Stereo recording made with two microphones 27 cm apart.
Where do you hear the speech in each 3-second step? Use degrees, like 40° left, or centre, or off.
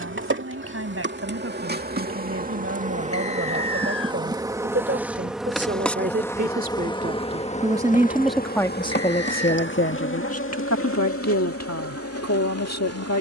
50° right, 50° right, 10° right, 60° left, 70° left.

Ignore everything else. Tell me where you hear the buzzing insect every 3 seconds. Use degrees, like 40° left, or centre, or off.
40° right, 10° right, 20° left, 50° left, 60° left.